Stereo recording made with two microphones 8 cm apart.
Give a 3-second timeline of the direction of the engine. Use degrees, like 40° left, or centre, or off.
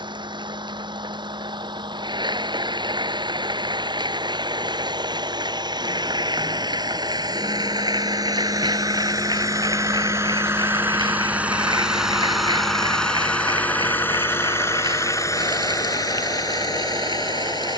70° right, 70° right, 60° right, 30° right, 20° left, 50° left.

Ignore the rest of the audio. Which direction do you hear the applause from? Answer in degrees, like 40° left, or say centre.
70° right.